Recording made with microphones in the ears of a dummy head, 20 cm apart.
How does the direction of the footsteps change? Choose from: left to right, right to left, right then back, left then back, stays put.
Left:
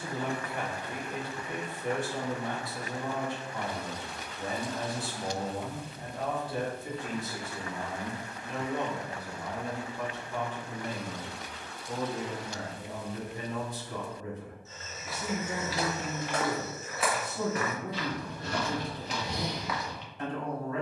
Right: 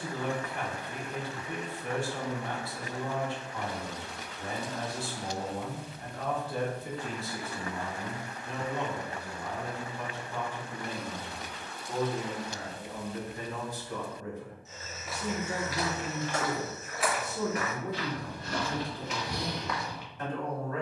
left then back.